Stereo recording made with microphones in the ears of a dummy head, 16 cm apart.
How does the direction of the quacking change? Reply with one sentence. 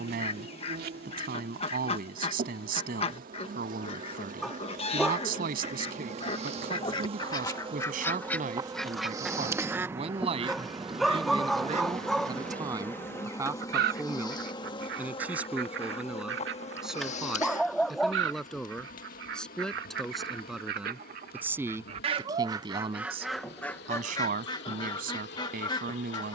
In this clip you hear the quacking move from left to right and back again.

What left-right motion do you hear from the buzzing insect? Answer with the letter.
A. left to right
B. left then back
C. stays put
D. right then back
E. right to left
E.